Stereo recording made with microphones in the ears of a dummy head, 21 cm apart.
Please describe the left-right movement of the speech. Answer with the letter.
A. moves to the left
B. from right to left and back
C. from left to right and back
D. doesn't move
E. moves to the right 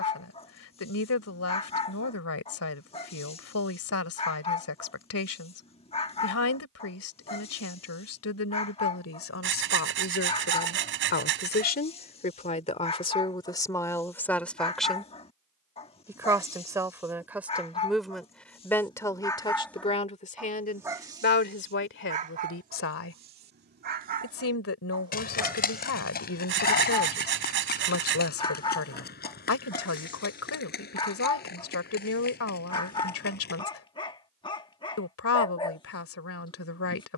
C.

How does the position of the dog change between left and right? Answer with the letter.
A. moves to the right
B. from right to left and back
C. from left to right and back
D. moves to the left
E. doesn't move
C.